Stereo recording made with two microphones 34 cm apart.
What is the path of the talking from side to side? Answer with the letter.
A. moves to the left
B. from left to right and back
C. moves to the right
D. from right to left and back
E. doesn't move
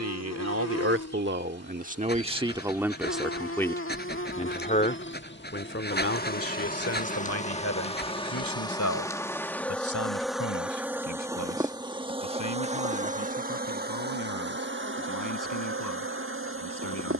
A.